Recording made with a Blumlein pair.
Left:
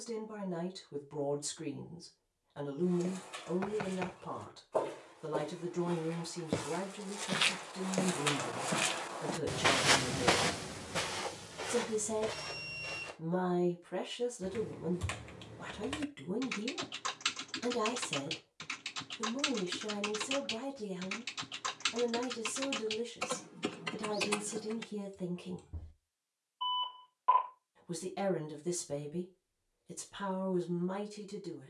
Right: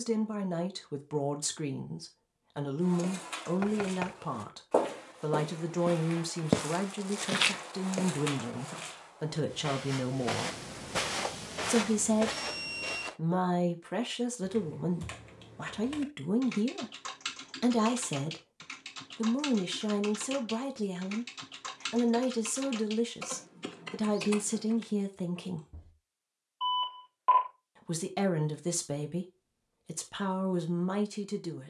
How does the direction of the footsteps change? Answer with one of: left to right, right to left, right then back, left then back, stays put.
left then back.